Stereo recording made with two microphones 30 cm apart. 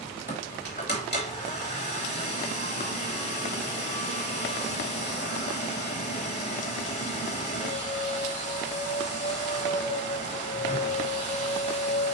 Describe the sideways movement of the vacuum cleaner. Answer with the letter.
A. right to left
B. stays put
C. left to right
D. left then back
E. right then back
B.